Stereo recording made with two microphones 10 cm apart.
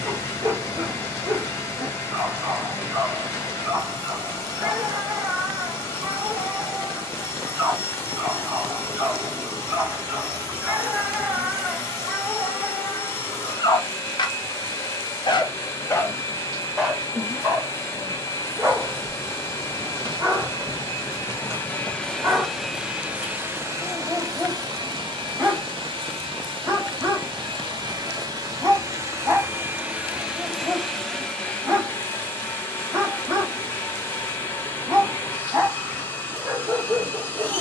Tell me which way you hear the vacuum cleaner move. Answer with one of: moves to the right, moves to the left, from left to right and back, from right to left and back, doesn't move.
from left to right and back.